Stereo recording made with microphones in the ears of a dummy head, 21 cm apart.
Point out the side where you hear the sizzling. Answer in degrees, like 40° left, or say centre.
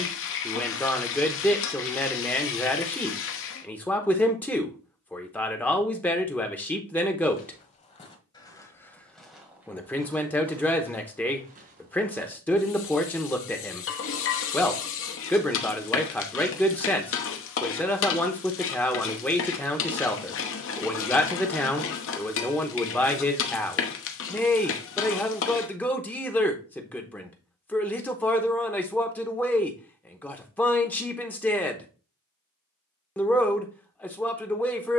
60° left.